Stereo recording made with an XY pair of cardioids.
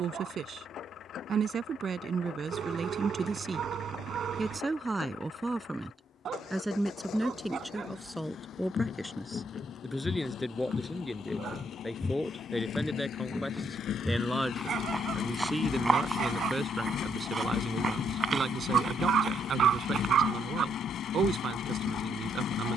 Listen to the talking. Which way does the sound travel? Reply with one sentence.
You can hear the talking go left and come back.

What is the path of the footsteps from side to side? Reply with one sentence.
In this clip you hear the footsteps go from the left side to the right.